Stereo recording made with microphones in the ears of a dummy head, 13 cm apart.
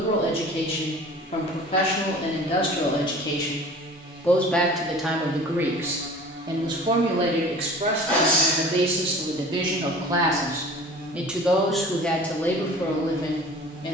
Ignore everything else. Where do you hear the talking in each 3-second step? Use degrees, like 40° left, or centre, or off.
40° left, 10° left, 40° right, 20° right, 20° left.